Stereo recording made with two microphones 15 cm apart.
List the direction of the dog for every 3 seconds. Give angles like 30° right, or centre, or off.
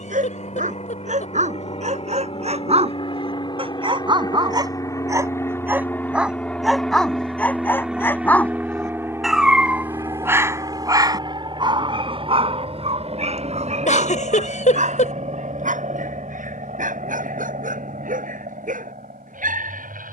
50° right, 30° right, 10° left, 20° right, 50° right, 60° right, 70° right.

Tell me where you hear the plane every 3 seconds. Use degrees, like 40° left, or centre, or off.
50° left, 20° left, centre, 20° right, 40° right, 50° right, 60° right.